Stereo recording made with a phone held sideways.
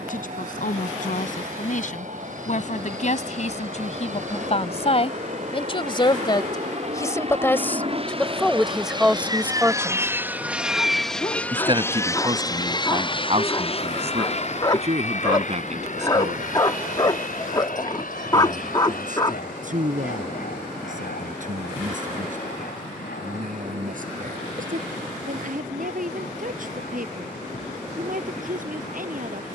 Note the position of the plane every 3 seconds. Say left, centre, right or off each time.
right, right, right, centre, left, left, left, left, left, left.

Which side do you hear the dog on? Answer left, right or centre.
left.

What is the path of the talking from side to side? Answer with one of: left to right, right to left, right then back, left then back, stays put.
left to right.